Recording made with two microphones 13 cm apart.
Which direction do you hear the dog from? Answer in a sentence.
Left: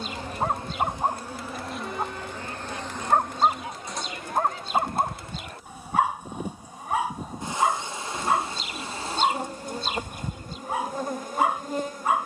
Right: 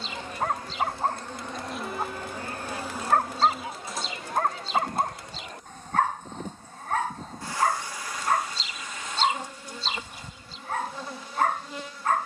In this clip you hear the dog in the centre.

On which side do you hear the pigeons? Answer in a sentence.
You can hear the pigeons on the left.